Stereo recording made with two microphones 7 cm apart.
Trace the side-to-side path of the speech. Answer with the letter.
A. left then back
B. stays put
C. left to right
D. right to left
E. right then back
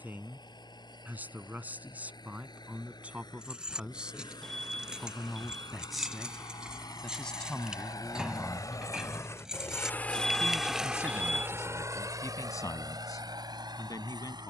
D.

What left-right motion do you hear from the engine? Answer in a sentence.
You can hear the engine travel towards the right.